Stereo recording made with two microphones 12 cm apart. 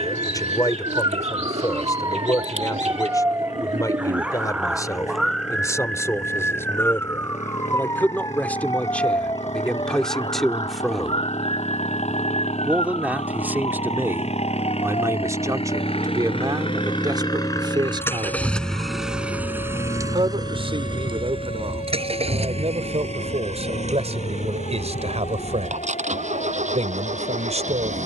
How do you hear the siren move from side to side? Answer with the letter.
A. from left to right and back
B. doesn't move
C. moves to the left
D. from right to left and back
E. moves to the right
C.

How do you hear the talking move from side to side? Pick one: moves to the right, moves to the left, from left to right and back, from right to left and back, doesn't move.
moves to the right.